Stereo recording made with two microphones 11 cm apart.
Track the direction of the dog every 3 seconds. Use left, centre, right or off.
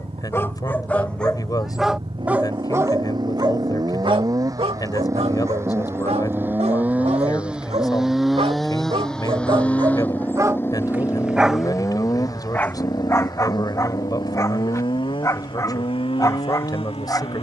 centre, right, right, right, left, left.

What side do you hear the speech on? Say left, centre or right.
left.